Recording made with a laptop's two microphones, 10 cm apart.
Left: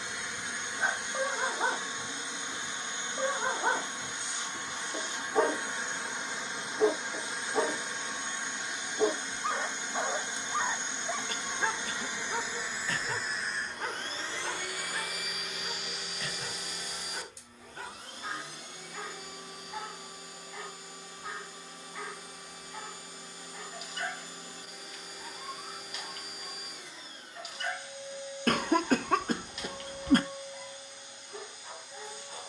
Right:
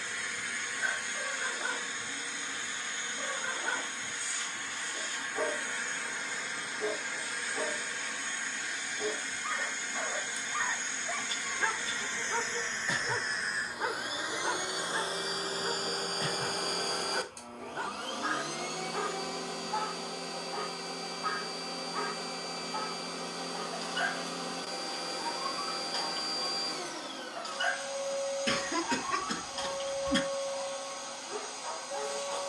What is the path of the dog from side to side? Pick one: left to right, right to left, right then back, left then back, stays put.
left to right.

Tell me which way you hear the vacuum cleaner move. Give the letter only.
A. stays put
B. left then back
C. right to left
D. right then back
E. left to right
E.